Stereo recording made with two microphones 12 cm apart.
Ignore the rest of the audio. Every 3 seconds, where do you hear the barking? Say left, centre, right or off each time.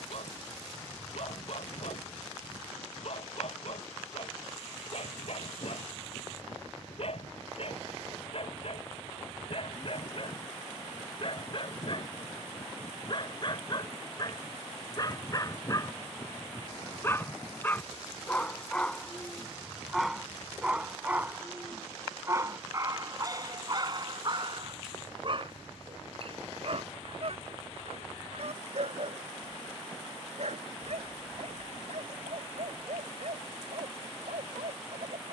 left, left, left, left, left, left, centre, right, right, right, right, right.